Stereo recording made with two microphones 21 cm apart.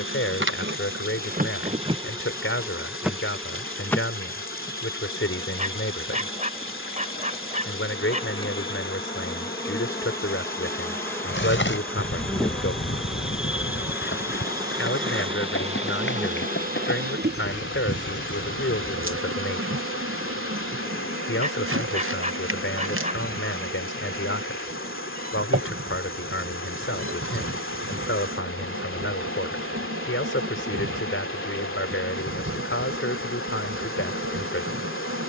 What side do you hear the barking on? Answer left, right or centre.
right.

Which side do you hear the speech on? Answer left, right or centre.
left.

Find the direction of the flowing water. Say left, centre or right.
left.